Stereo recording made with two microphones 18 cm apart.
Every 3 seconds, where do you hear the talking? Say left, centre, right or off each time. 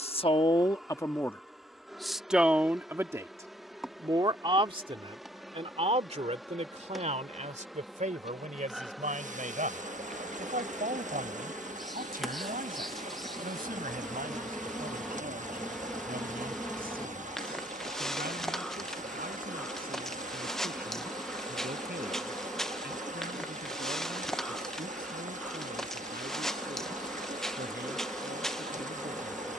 centre, right, right, right, right, right, right, right, right, right.